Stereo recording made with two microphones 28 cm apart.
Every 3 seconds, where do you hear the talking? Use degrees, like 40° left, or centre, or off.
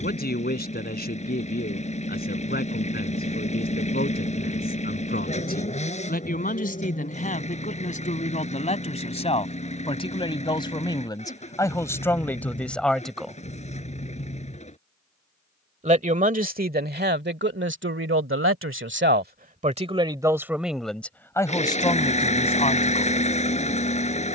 30° left, 30° left, 30° left, 20° left, centre, 30° right, 20° right, 20° left.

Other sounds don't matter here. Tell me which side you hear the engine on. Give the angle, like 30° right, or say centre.
20° left.